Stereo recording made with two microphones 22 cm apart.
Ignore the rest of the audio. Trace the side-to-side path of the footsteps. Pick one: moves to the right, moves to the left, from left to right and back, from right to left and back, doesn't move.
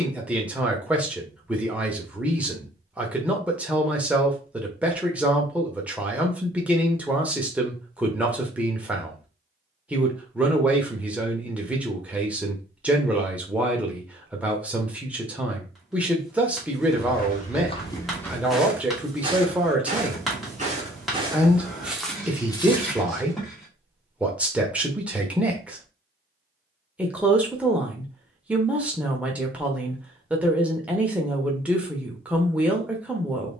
from left to right and back.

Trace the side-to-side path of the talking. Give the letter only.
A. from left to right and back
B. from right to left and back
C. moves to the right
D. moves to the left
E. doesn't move
E.